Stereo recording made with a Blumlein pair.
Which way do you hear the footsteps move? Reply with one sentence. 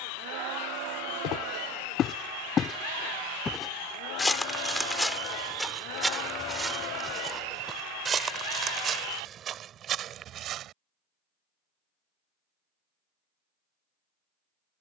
In this clip you hear the footsteps move from left to right.